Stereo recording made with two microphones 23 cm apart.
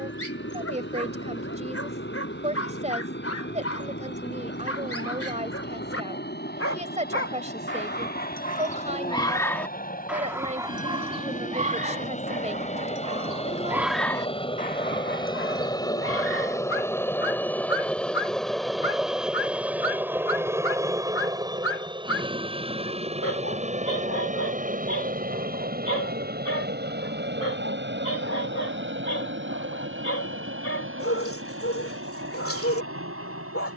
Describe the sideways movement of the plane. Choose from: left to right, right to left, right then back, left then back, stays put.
left to right.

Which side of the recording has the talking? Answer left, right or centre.
right.